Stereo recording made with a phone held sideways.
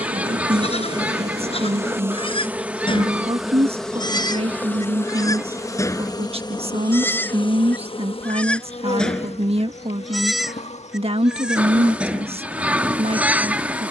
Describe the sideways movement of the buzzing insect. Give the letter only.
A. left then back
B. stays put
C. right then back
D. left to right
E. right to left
E.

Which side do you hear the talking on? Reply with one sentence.
You can hear the talking on the right.